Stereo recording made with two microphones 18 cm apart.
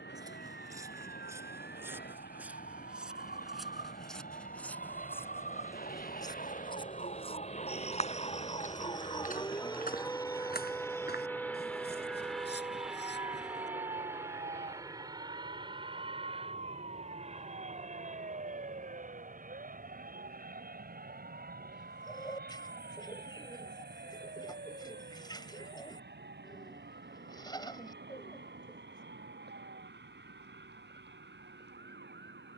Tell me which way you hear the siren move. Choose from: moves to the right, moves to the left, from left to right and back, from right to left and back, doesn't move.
moves to the right.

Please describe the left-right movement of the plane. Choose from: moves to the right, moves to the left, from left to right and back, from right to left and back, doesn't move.
moves to the right.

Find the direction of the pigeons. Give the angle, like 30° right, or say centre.
20° left.